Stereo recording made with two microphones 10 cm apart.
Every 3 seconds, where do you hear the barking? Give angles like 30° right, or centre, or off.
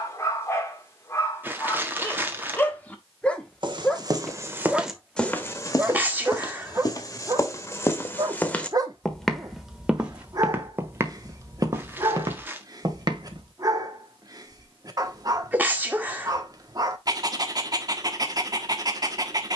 20° left, centre, 30° right, 40° right, 40° right, 40° right, 40° right.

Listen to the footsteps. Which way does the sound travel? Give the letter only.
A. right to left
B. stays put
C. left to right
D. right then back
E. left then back
E.